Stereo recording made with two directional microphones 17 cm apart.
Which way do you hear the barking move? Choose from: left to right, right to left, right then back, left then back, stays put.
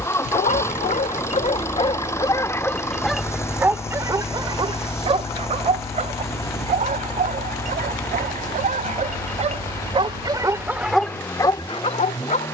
right then back.